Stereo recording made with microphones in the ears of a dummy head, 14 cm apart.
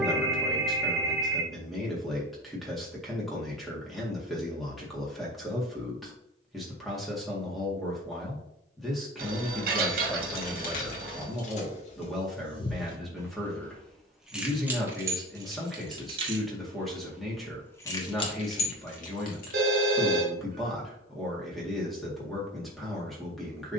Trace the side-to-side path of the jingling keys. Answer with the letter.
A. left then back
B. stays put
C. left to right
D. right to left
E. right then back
E.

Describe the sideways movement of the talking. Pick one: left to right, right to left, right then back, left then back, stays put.
stays put.